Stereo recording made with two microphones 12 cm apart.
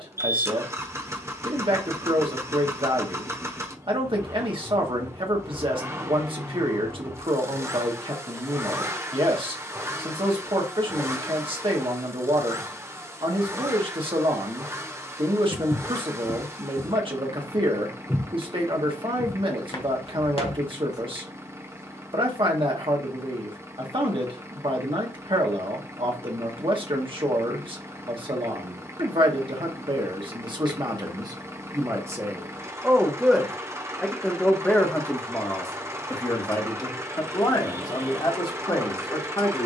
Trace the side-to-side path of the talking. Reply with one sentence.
You can hear the talking move to the left.